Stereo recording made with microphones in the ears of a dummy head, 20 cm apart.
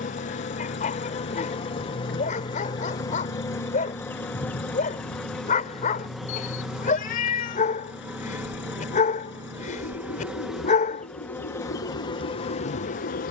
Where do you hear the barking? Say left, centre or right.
left.